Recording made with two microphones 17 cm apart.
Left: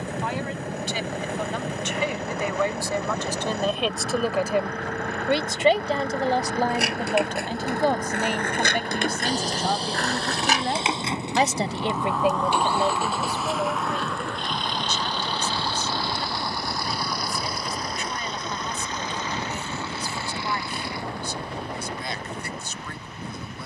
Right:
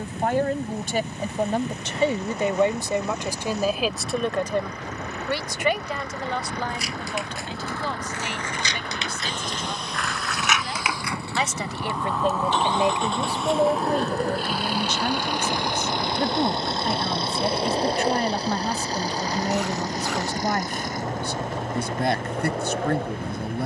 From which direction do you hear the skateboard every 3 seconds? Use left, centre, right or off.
off, off, left, left, right, right, right, right.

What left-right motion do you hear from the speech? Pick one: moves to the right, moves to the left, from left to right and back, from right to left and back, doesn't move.
from right to left and back.